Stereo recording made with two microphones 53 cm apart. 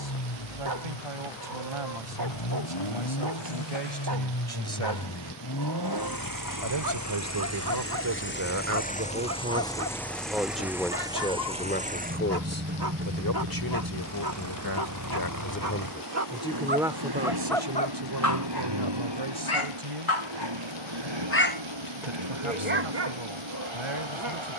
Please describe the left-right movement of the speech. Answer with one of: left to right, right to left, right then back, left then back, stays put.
left then back.